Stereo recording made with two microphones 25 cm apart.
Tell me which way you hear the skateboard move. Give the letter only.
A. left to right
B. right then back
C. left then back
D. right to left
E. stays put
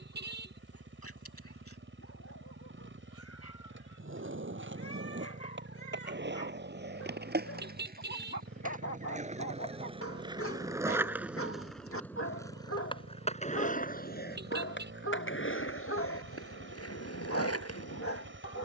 D.